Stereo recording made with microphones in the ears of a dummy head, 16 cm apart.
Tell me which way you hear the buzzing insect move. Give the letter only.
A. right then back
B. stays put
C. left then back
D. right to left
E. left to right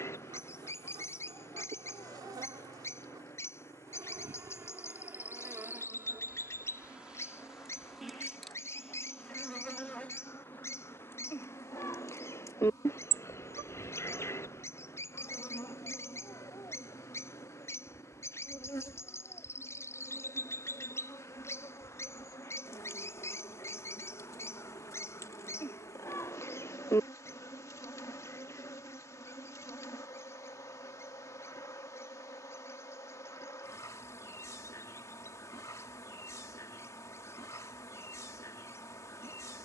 D.